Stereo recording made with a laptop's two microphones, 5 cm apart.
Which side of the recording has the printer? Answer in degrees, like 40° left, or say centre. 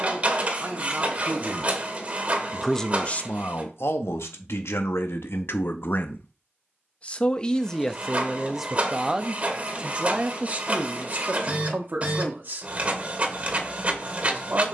30° right.